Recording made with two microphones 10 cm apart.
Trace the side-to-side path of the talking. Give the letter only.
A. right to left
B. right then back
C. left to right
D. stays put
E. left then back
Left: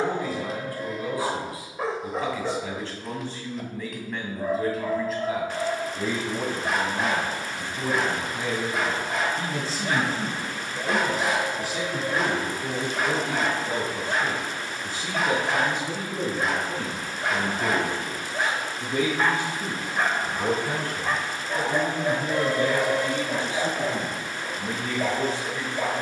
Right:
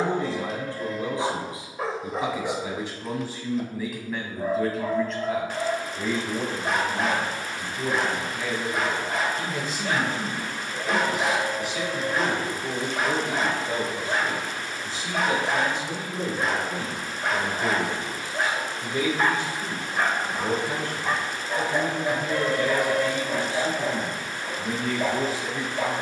E.